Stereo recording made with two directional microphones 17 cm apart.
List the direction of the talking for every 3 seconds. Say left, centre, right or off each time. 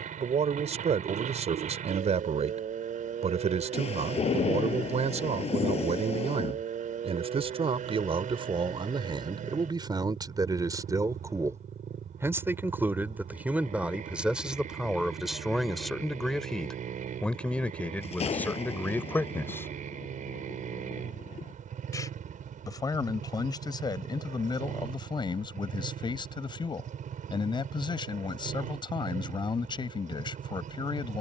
right, right, right, right, centre, centre, centre, left, left, left, left.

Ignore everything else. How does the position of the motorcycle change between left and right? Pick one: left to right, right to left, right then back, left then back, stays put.
stays put.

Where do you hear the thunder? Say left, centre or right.
left.